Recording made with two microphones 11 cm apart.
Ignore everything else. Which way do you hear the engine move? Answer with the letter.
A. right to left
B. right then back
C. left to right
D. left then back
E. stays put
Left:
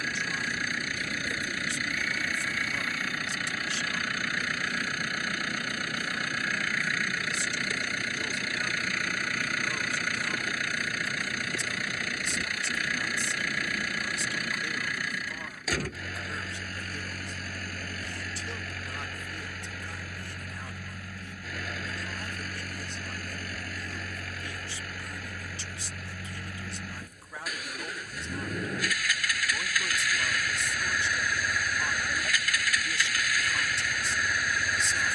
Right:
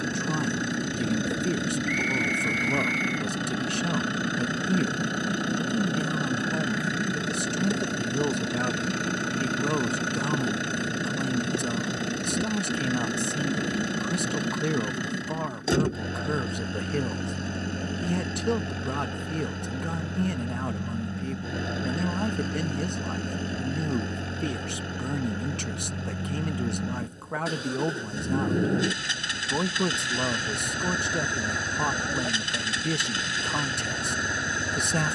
E.